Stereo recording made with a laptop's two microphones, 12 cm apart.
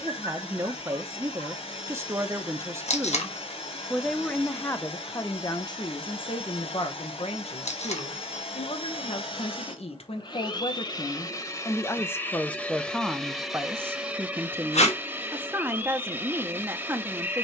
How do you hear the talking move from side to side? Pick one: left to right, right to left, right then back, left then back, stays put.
left then back.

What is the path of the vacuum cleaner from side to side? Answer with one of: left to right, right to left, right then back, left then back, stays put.
left to right.